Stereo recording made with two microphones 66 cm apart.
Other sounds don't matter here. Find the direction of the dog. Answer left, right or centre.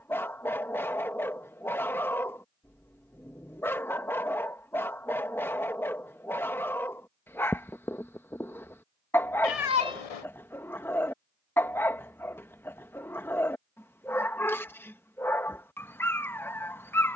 centre.